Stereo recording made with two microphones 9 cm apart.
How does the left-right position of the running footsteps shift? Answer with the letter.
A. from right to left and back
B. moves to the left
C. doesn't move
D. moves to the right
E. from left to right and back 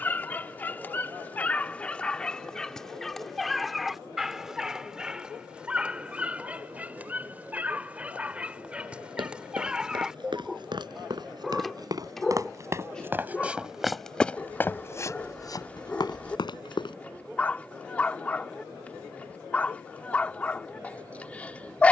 B.